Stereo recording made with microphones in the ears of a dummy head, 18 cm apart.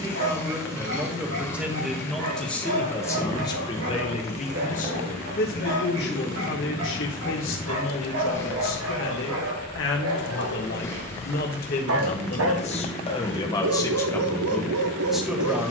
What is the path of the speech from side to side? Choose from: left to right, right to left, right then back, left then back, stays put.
left then back.